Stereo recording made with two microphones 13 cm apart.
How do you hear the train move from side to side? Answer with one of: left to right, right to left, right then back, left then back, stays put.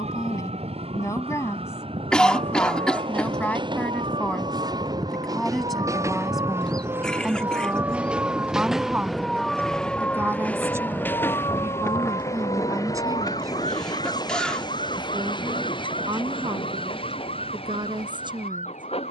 right to left.